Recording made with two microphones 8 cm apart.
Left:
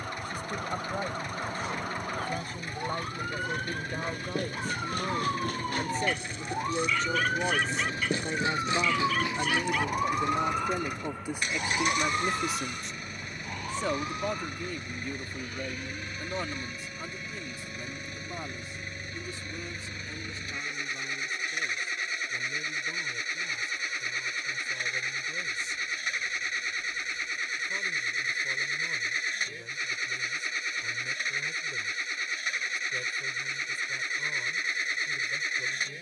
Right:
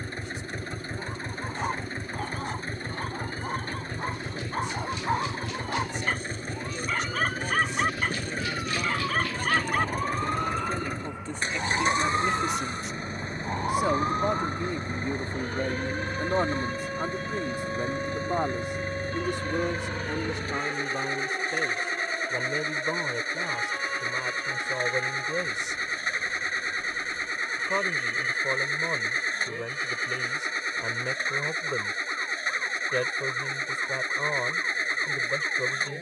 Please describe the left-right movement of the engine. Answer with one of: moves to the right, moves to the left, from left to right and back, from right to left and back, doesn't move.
doesn't move.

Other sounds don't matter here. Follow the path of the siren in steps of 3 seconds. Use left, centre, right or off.
left, left, left, centre, right, right, right, right, right, right, right, right.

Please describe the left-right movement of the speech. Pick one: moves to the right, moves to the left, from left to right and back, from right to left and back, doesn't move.
moves to the right.